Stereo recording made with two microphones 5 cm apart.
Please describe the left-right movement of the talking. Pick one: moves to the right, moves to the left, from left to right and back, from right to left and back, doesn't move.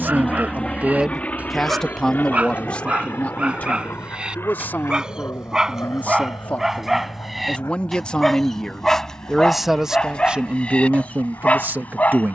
from right to left and back.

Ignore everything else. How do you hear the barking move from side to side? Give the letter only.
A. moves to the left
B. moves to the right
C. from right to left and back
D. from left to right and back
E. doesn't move
A.